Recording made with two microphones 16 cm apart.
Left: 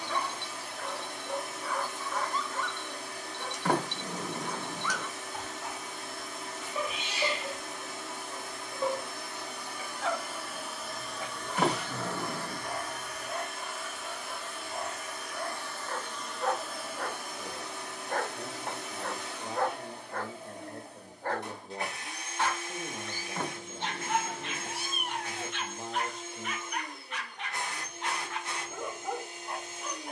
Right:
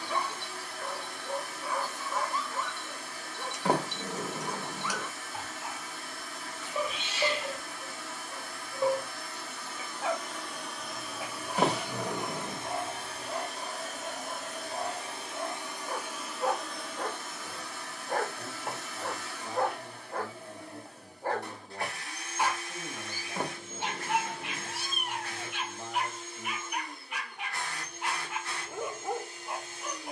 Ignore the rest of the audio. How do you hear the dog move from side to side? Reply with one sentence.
You can hear the dog stay in one place.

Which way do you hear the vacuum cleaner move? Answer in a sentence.
You can hear the vacuum cleaner go right and come back.